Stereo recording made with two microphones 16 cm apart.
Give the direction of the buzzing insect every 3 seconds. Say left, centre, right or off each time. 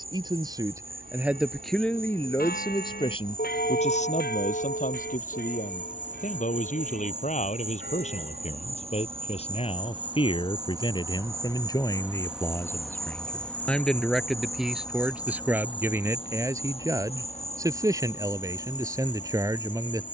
right, right, right, right, centre, left, left.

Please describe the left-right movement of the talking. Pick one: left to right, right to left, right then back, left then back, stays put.
left then back.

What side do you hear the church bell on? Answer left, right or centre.
left.